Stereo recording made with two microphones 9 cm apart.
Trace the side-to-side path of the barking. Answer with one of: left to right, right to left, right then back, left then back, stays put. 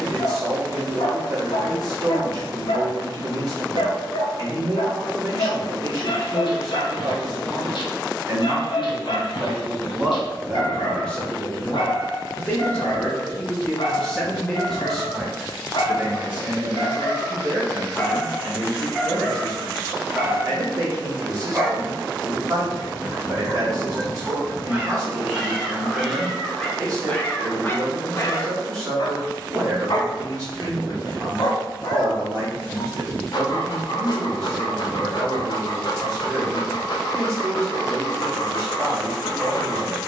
right then back.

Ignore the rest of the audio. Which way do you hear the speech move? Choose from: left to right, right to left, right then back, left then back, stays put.
left then back.